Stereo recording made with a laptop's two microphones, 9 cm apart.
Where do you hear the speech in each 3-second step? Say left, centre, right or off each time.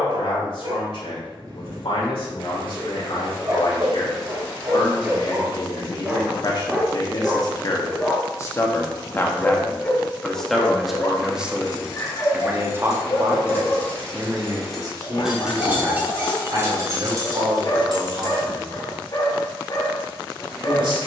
left, left, left, centre, right, right, right.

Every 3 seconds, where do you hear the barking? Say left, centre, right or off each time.
right, right, centre, left, left, left, left.